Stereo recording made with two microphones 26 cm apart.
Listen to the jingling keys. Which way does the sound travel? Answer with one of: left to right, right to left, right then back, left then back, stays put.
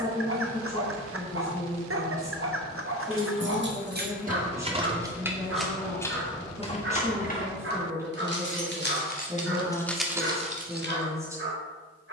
left then back.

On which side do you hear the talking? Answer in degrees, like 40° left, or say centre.
10° right.